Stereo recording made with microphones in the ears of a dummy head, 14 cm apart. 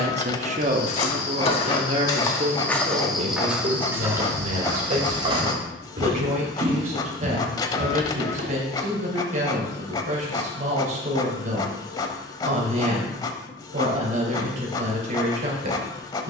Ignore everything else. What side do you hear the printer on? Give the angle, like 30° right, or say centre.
30° left.